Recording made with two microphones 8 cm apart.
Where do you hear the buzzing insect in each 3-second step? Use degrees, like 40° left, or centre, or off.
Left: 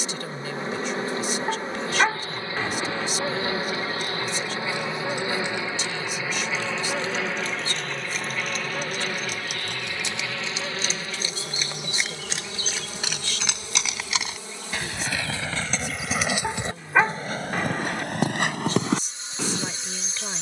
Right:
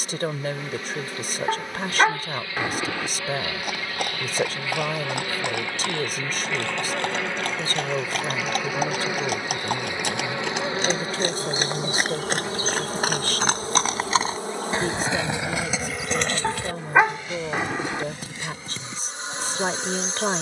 30° left, 20° left, centre, 30° right, 40° right, 50° right, 60° right.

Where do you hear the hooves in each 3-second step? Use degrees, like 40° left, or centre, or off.
off, 70° right, 60° right, 60° right, 40° right, 20° left, 70° left.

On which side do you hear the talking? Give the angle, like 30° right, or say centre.
50° right.